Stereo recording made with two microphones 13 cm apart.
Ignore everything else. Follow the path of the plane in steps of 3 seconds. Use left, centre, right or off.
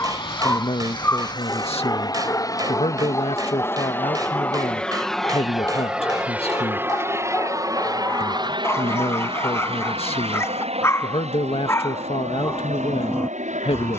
left, centre, right, right, right.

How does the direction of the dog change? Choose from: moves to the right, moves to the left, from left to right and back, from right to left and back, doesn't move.
doesn't move.